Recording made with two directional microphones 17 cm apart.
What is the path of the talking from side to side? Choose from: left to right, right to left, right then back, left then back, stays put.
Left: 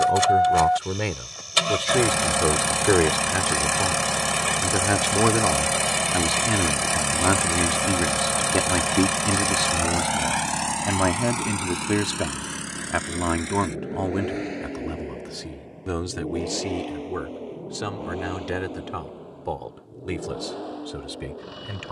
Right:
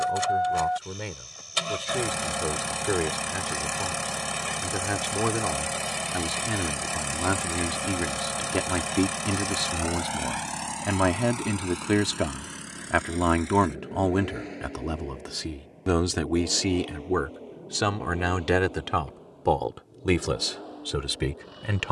left to right.